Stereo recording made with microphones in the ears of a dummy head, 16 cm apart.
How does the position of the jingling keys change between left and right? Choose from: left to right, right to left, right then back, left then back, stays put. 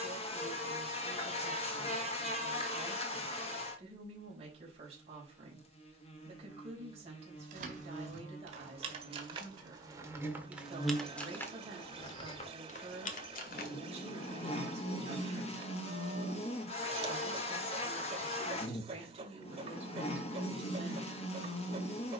right to left.